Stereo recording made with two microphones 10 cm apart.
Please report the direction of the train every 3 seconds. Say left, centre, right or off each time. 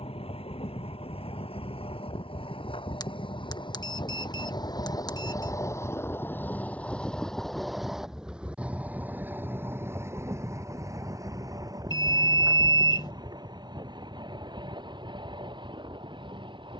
left, left, centre, right, right, right.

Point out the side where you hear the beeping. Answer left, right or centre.
left.